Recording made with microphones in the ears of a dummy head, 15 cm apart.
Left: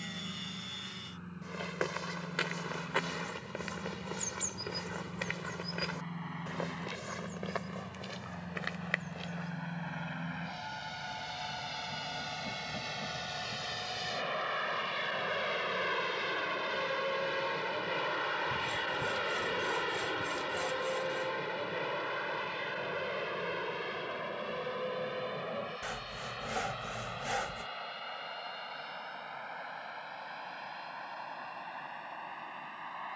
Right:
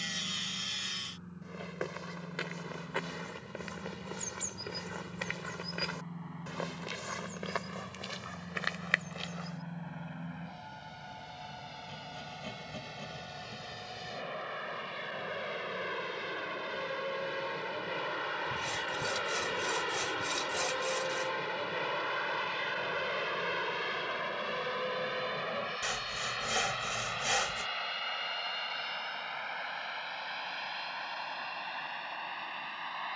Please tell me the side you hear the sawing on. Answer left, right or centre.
right.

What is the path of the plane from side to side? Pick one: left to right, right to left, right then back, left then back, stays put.
left to right.